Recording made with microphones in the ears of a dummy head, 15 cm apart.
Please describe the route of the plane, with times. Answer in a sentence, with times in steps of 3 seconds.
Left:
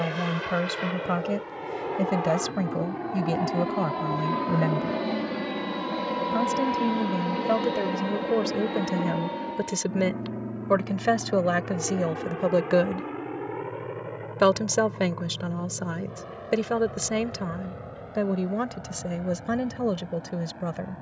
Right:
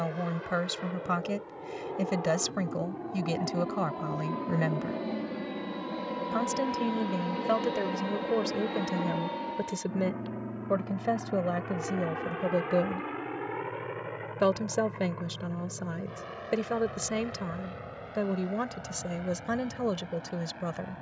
In this clip you hear the plane on the left from 0 s, in the centre from 6 s and on the right from 9 s.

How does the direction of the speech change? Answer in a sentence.
You can hear the speech go left and come back.